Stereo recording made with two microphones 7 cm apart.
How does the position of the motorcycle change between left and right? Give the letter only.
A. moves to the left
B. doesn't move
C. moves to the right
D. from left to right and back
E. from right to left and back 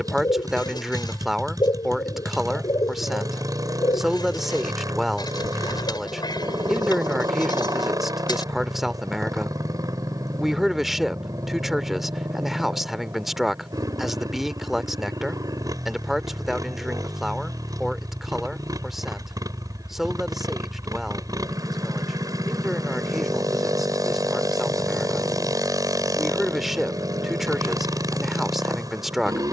B.